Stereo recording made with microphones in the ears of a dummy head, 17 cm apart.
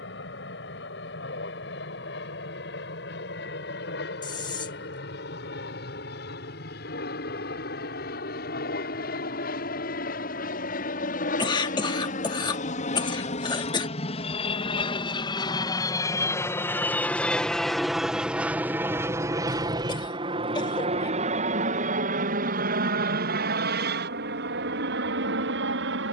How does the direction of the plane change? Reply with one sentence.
You can hear the plane go from the left side to the right.